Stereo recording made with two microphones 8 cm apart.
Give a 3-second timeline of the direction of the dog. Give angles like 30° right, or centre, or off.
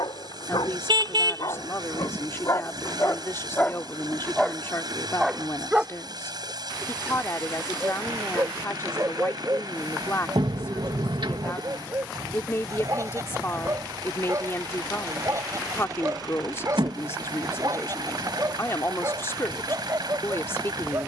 50° left, 10° left, 30° right, 40° right, 40° right, 40° right, 40° right.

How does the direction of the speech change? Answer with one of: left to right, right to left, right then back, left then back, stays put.
stays put.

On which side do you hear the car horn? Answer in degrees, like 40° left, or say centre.
70° right.